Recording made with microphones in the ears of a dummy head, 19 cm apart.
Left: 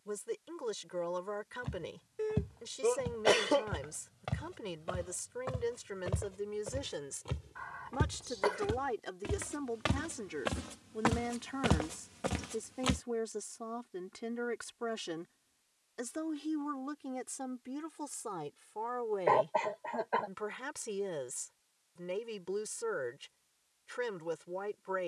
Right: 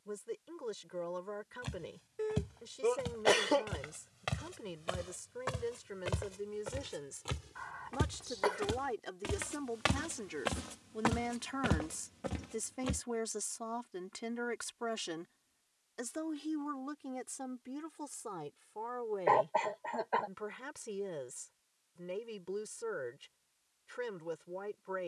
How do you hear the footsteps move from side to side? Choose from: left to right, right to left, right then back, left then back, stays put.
right to left.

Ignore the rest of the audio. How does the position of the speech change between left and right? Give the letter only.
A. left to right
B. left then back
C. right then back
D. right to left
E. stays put
C.